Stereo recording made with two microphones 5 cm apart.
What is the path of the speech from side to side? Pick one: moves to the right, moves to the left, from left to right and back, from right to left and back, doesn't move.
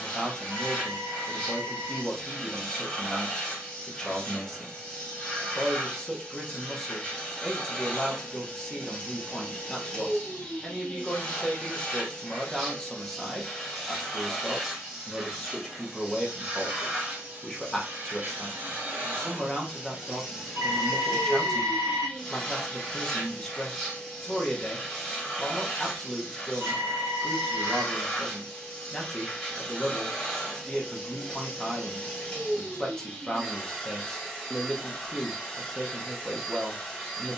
doesn't move.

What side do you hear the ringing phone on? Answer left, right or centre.
right.